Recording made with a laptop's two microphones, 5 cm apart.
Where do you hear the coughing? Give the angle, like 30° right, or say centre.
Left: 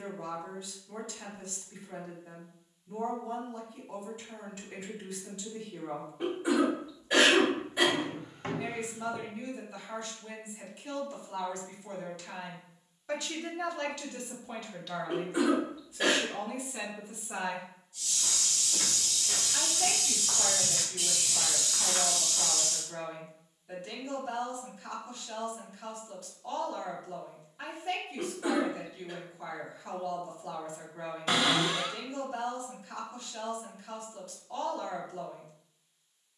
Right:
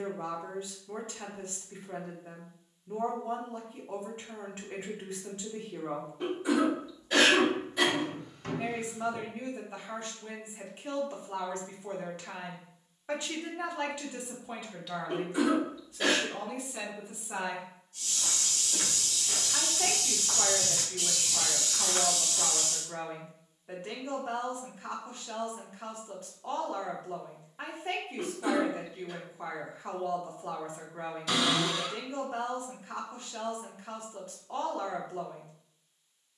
20° left.